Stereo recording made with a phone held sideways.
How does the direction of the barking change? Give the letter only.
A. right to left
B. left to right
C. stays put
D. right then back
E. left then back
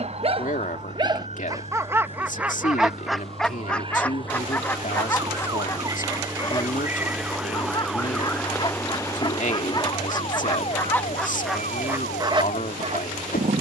E.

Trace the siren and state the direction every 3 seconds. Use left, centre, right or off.
right, right, centre, left, left.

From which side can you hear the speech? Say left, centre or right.
left.